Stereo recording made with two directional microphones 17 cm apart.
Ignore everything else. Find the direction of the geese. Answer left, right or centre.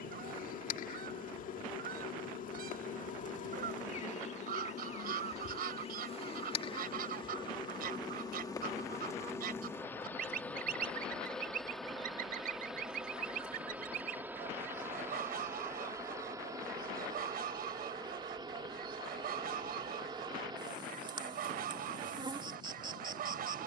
right.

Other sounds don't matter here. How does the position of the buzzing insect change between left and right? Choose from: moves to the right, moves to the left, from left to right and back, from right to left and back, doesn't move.
moves to the right.